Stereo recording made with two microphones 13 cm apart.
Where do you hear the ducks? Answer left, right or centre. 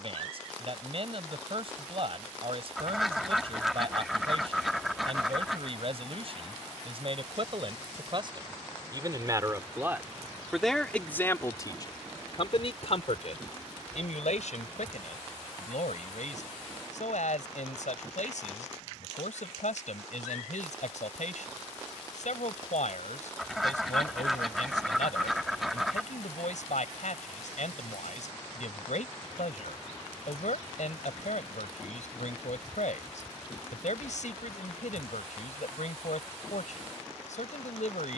centre.